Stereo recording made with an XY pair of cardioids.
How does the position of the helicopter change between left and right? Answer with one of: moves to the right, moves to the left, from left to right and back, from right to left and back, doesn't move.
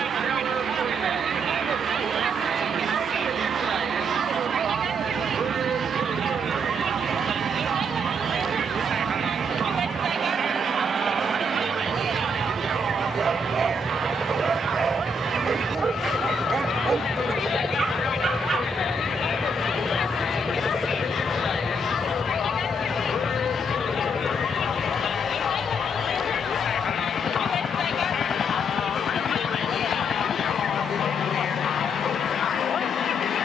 moves to the left.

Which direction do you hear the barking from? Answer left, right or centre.
right.